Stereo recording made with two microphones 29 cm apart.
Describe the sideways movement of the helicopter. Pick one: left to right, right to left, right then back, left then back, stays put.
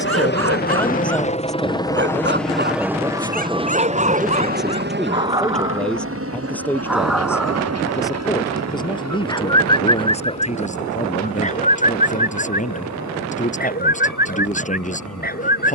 left to right.